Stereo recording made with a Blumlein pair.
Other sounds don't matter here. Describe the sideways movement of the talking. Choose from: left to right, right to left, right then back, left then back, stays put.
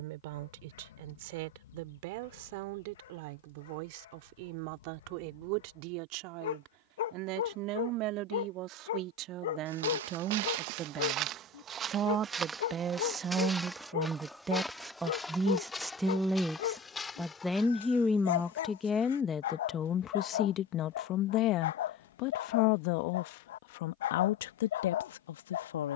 right to left.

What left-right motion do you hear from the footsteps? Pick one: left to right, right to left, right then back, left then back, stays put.
right to left.